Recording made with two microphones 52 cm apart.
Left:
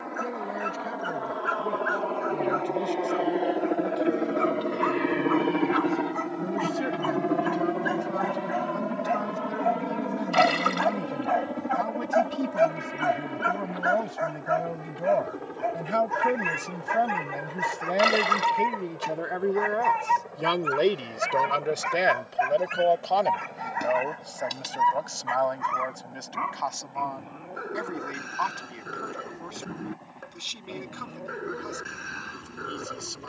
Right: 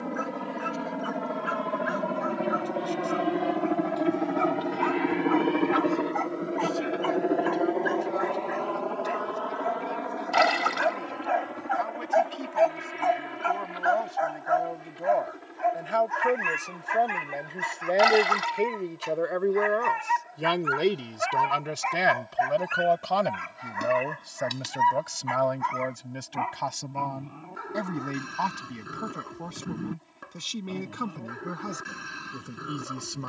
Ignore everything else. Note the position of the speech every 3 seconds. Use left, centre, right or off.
left, left, left, left, left, left, centre, right, right, right, right.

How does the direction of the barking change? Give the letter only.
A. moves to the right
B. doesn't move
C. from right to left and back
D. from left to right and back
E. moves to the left
C.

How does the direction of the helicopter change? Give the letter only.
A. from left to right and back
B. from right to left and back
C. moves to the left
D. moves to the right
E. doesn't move
C.